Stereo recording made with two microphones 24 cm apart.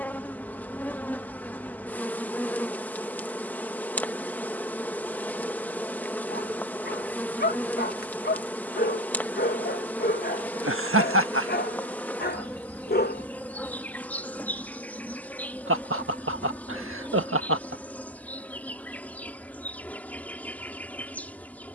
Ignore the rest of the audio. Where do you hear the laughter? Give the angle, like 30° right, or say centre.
60° right.